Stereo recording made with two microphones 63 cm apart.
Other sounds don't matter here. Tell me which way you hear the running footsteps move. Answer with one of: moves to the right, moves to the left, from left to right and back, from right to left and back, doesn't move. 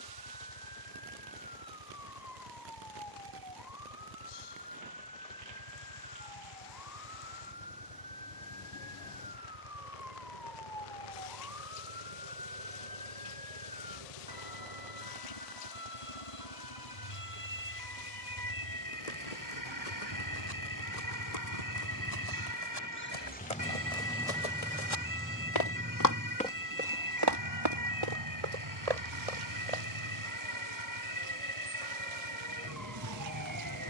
moves to the right.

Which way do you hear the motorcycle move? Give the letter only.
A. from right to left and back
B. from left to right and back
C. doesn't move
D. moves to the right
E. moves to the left
D.